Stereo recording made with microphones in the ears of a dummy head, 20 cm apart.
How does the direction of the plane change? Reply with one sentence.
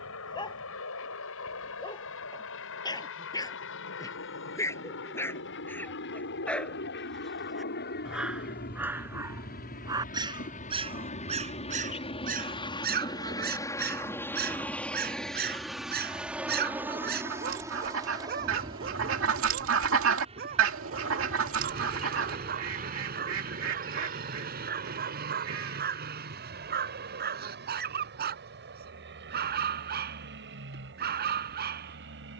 In this clip you hear the plane go from the left side to the right.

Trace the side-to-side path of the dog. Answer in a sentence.
You can hear the dog travel towards the right.